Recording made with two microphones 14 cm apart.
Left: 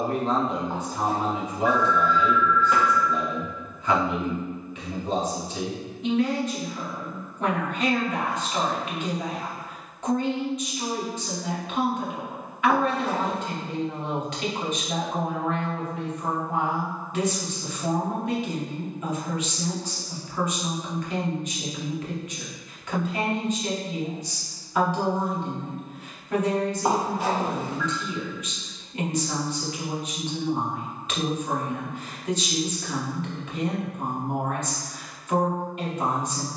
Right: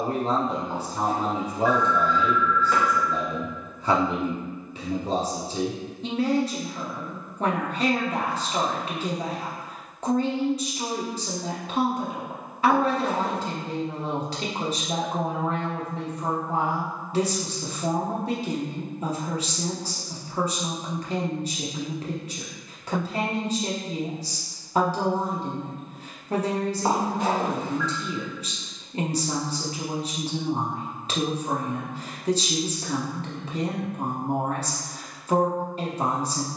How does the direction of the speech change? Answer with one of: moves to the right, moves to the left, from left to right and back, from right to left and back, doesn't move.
doesn't move.